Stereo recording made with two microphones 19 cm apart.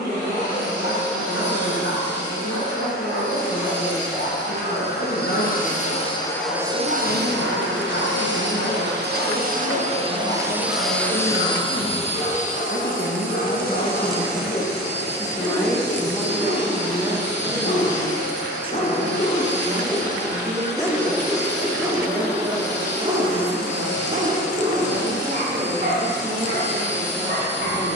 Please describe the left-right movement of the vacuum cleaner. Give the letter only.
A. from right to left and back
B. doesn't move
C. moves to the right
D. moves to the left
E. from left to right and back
E.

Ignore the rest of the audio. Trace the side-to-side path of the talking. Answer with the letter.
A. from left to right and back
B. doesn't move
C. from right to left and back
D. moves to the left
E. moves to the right
E.